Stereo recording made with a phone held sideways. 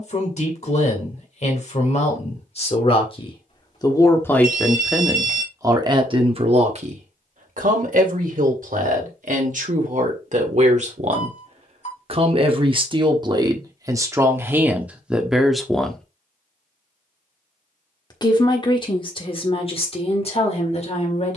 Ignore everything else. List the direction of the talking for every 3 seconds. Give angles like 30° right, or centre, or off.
50° left, centre, 50° right, 50° right, 30° right, centre, 40° left.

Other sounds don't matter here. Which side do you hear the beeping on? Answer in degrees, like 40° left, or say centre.
50° left.